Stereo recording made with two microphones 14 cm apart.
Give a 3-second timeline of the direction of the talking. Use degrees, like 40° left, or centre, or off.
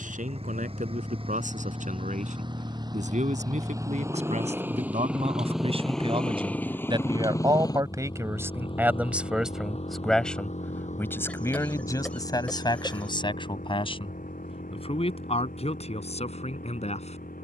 70° right, 50° right, 30° right, 10° left, 40° left, 50° left.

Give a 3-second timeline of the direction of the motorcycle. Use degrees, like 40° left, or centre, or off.
40° right, 20° right, 20° left, 50° left, 70° left, 80° left.